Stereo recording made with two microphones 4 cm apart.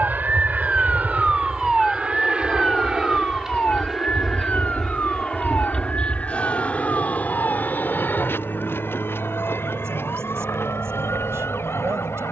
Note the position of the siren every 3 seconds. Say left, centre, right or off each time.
centre, left, left, left.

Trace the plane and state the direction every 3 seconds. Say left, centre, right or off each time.
right, centre, left, left.